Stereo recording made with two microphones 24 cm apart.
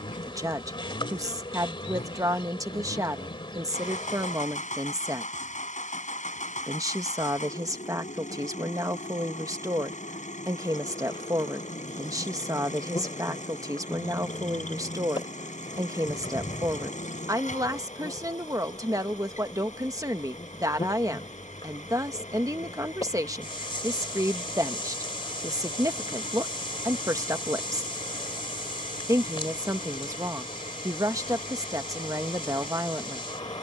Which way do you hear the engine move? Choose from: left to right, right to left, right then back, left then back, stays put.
stays put.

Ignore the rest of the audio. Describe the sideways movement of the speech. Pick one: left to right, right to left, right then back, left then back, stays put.
stays put.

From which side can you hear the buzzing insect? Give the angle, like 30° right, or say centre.
20° left.